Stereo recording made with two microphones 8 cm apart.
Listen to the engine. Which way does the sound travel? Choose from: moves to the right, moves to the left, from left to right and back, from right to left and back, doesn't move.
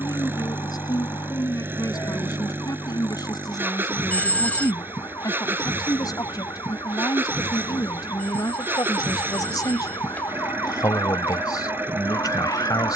doesn't move.